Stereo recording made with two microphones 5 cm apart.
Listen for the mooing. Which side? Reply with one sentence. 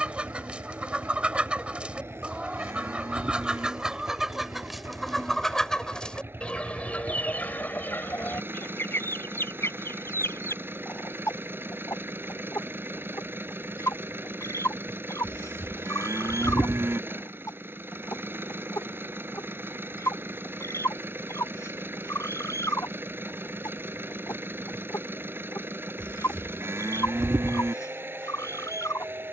You can hear the mooing on the right.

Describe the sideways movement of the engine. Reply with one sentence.
In this clip you hear the engine stay in one place.